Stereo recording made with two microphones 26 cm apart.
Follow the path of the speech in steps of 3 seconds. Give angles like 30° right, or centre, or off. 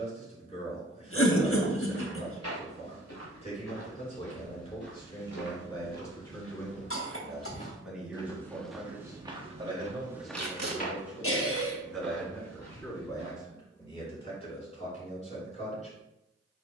30° left, 20° left, centre, 10° right, 20° left, 30° left.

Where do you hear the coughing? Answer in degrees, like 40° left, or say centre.
50° left.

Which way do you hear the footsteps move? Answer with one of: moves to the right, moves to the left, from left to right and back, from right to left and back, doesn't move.
from left to right and back.